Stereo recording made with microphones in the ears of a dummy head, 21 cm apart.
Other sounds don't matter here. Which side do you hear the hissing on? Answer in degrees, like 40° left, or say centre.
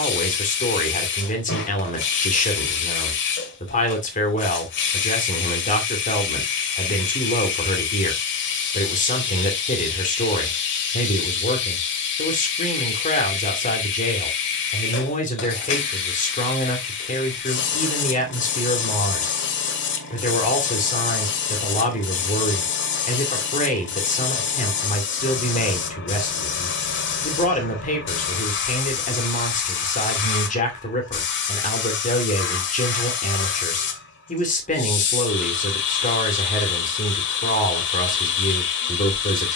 50° left.